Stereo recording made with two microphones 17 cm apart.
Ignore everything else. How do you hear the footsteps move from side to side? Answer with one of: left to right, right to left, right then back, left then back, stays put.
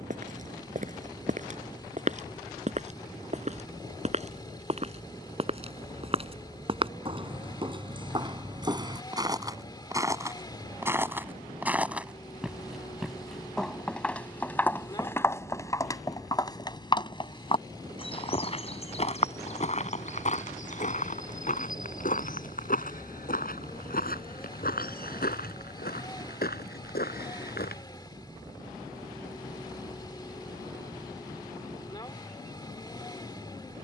right to left.